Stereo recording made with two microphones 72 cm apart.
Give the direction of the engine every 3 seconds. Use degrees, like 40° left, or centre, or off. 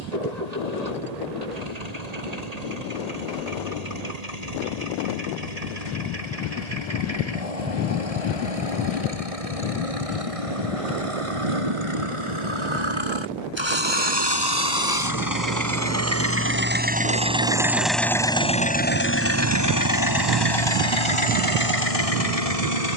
60° right, 60° right, 50° right, 50° right, 40° right, 20° right, 20° left, 50° left.